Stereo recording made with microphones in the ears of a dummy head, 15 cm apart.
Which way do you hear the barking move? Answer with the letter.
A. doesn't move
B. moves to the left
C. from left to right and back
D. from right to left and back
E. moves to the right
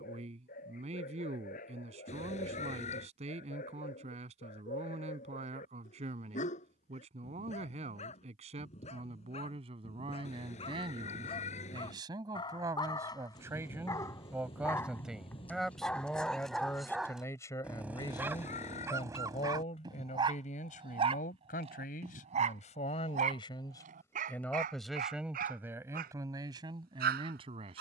E.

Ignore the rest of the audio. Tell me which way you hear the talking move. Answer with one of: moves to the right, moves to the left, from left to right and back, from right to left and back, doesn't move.
from right to left and back.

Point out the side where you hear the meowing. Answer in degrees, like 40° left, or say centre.
40° left.